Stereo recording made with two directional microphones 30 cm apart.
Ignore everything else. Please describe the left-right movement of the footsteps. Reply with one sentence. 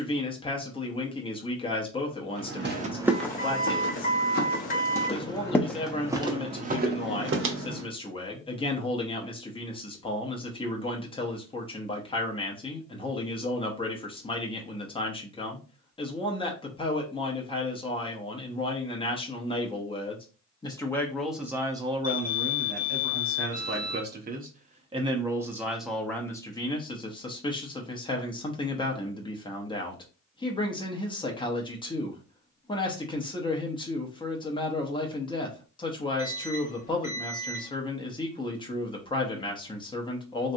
In this clip you hear the footsteps go left and come back.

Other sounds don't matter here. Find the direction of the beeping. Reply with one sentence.
You can hear the beeping on the left.